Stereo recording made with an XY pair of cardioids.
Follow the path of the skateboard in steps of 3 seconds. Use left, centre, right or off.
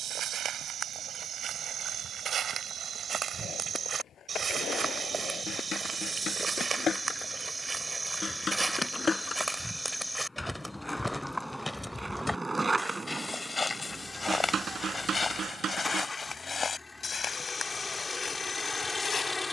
off, left, left, centre, right, right, off.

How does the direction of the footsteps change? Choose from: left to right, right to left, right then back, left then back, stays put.
right to left.